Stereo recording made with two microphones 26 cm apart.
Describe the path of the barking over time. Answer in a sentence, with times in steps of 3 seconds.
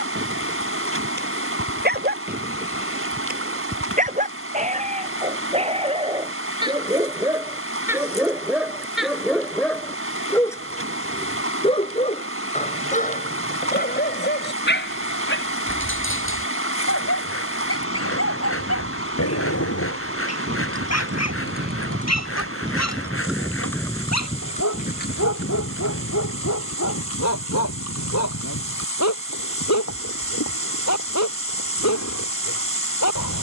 In this clip you hear the barking on the right from 0 s, in the centre from 6 s and on the left from 12 s.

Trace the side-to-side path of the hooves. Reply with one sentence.
You can hear the hooves move to the left.